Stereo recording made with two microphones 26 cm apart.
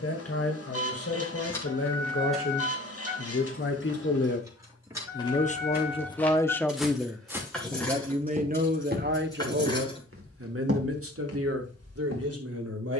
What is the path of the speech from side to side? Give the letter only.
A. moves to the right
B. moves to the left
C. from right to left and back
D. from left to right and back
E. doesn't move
A.